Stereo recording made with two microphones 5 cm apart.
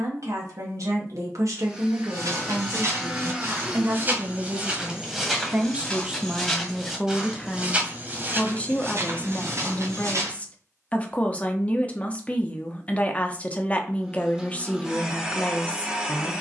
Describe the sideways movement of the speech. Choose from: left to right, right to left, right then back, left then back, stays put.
right to left.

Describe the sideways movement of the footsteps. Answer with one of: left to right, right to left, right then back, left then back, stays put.
left then back.